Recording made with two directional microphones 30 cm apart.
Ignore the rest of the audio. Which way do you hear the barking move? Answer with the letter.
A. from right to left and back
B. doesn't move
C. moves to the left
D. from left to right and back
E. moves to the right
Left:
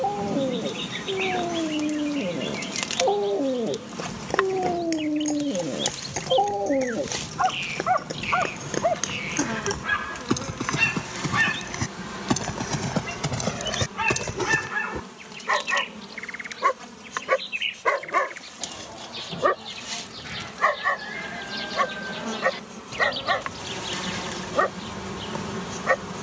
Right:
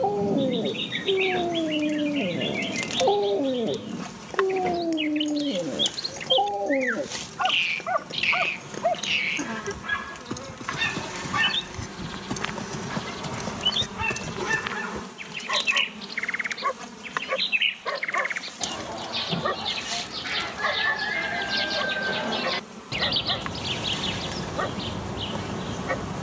C.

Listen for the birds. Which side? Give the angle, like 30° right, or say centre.
50° right.